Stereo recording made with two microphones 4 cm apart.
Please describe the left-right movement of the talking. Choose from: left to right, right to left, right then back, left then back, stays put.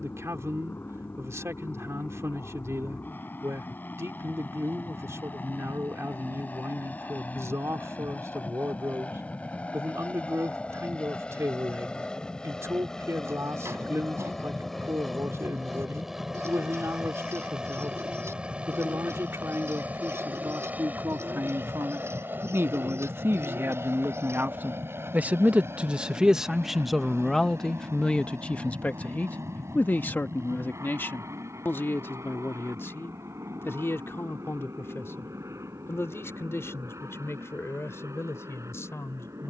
right to left.